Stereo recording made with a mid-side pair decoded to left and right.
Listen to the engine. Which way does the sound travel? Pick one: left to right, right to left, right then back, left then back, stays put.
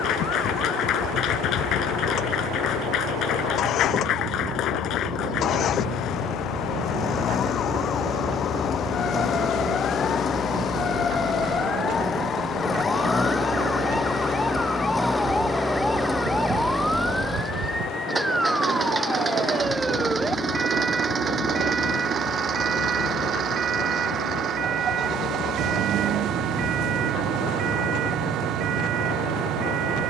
left to right.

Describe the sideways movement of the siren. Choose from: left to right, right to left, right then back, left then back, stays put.
left to right.